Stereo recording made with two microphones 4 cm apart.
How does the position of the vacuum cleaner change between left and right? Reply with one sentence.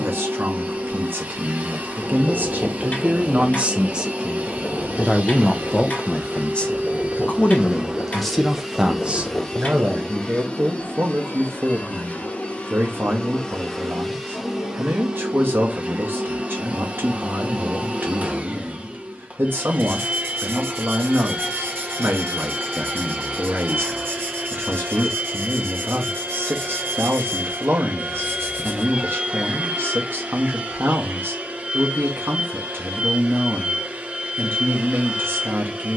In this clip you hear the vacuum cleaner go left and come back.